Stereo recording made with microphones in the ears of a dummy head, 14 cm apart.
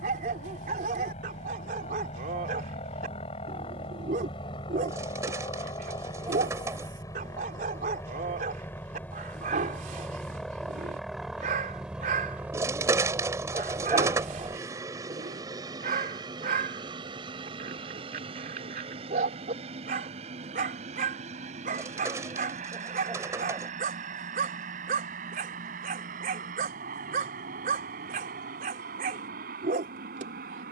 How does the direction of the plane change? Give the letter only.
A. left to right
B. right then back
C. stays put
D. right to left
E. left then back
A.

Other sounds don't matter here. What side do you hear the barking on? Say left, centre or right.
right.